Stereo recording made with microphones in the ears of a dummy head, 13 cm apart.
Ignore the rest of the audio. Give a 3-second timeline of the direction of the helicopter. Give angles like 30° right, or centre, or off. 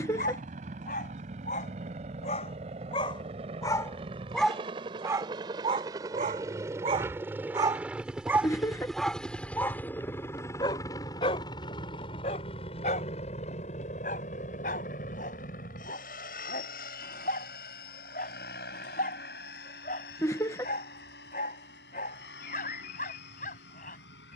50° right, 40° right, 10° right, 20° left, 40° left, 60° left, 70° left, 70° left.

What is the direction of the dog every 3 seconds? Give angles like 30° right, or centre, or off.
50° left, centre, 30° right, 20° left, 50° left, 60° left, 60° left, 60° left.